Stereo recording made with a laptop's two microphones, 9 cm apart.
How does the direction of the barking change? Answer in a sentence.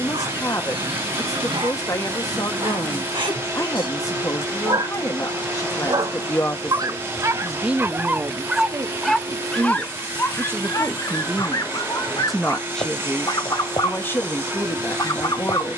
You can hear the barking move from right to left.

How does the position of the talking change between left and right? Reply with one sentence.
You can hear the talking move from left to right and back again.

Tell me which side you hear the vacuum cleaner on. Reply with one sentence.
You can hear the vacuum cleaner on the right.